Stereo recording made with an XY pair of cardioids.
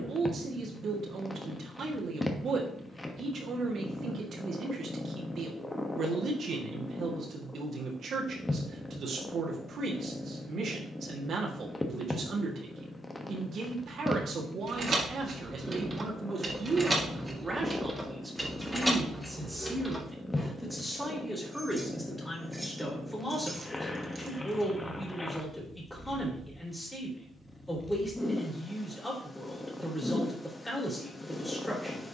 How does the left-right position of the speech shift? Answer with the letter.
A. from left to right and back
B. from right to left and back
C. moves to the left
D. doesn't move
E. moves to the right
C.